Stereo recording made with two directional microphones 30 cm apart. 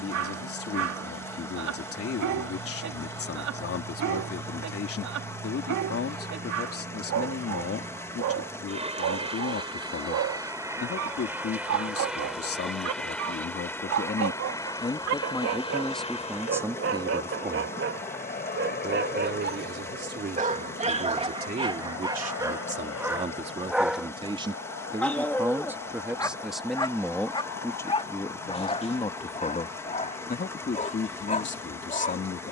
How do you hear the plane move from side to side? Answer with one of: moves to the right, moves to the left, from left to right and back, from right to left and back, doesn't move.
moves to the left.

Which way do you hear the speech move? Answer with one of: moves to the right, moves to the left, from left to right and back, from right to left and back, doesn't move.
from left to right and back.